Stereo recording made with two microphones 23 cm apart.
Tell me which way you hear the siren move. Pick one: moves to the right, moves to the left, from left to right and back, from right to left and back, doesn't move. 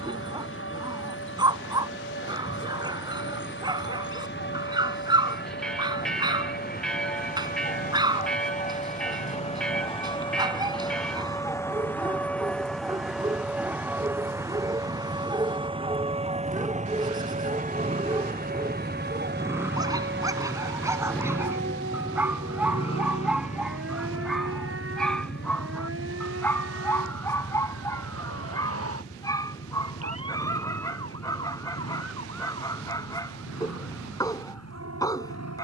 moves to the right.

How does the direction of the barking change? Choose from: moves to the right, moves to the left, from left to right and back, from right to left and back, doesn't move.
moves to the left.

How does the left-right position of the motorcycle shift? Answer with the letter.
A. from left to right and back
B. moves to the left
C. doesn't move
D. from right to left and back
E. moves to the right
B.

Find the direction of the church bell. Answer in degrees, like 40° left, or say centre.
centre.